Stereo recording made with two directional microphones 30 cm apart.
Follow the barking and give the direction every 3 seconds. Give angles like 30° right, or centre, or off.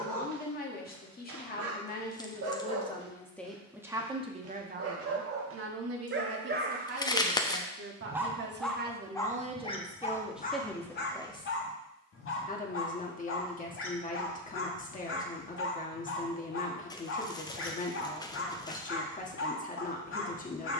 70° right, 50° right, 20° right, 30° left, 40° left, 40° left, 40° left.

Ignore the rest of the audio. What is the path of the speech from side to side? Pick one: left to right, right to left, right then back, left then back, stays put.
right then back.